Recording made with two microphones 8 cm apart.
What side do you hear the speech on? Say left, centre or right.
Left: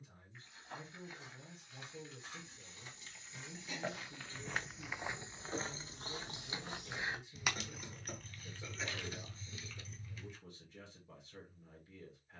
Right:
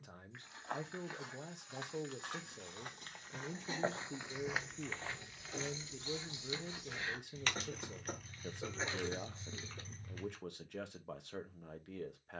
right.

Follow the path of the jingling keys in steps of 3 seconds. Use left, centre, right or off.
off, left, centre, right.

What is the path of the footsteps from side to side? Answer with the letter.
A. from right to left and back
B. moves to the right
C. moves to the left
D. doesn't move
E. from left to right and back
C.